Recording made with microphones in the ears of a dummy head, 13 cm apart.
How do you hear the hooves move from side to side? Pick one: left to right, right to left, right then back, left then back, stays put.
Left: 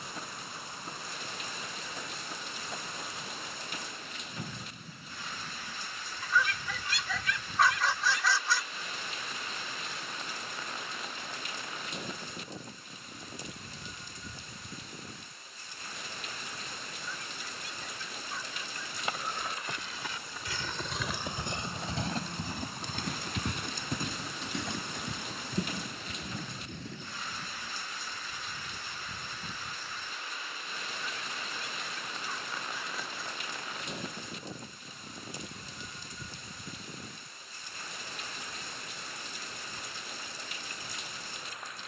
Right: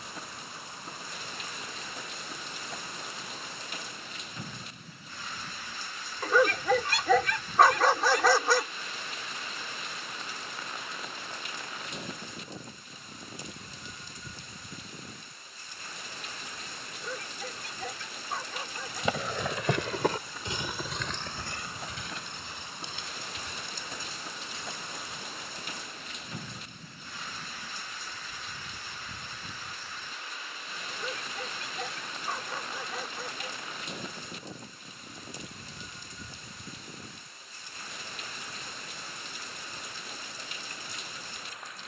right to left.